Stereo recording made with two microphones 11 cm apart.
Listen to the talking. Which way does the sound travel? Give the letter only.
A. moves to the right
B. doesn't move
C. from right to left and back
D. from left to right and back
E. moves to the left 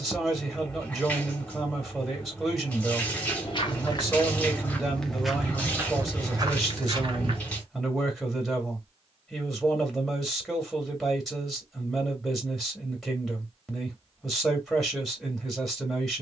B.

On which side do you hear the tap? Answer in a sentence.
In this clip you hear the tap in the centre.